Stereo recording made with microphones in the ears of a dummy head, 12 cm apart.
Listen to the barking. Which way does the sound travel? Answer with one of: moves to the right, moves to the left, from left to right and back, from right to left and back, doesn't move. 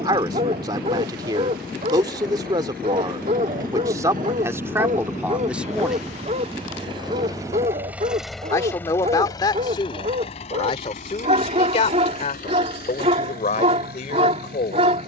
doesn't move.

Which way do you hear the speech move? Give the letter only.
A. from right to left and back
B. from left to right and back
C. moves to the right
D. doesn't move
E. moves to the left
E.